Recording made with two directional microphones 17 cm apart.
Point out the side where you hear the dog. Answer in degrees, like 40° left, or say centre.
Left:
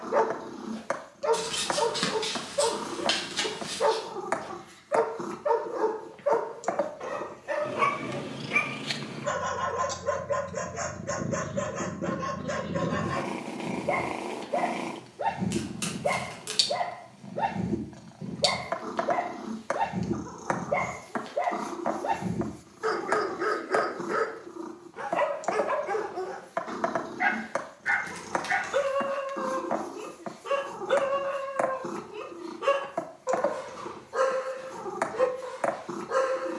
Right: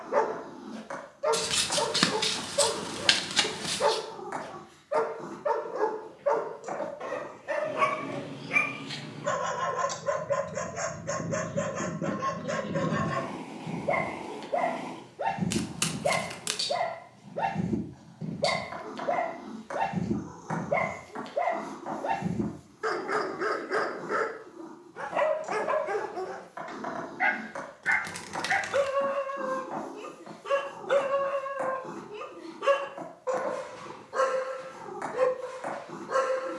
centre.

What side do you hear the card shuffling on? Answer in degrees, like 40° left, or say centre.
40° right.